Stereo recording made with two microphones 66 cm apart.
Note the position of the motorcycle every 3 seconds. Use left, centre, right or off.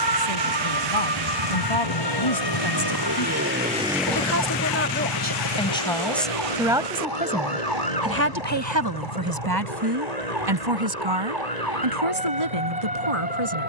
right, centre, left, left, left.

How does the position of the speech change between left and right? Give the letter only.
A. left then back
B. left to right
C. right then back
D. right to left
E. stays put
B.